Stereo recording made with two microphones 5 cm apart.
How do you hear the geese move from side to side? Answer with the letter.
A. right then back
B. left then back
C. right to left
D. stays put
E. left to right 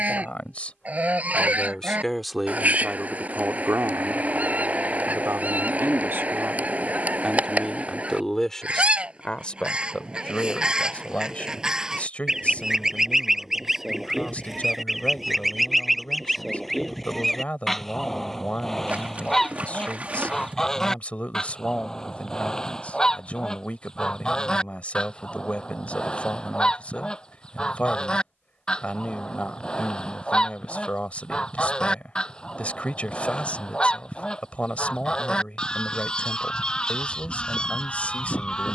C.